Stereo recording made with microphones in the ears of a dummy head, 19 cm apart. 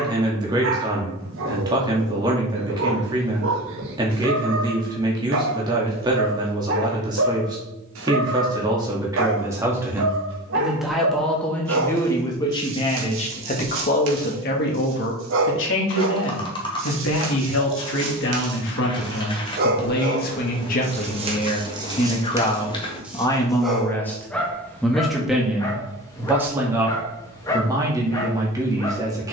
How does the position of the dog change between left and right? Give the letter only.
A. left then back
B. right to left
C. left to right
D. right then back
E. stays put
B.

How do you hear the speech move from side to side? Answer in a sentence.
In this clip you hear the speech move from right to left and back again.